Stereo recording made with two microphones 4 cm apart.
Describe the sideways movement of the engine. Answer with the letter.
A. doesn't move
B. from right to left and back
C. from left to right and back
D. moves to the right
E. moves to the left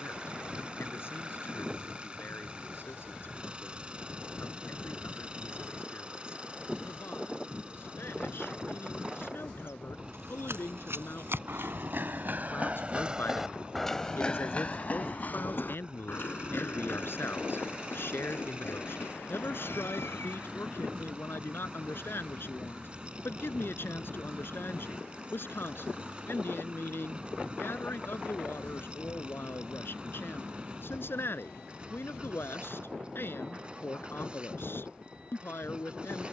A.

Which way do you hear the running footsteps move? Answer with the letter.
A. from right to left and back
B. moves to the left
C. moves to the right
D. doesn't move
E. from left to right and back
B.